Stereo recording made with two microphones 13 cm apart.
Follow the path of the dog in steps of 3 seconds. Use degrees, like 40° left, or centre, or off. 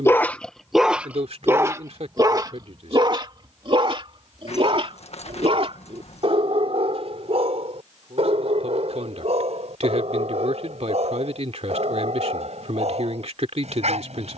10° right, 40° right, 50° right, 60° right, 60° right.